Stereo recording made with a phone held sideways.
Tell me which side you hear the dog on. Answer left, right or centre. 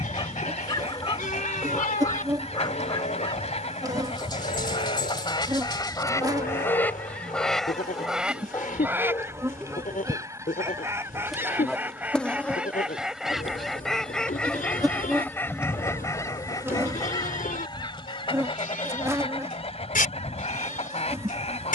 left.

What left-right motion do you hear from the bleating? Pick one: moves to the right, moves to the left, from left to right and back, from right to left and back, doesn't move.
doesn't move.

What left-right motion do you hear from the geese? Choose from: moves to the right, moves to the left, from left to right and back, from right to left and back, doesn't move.
from left to right and back.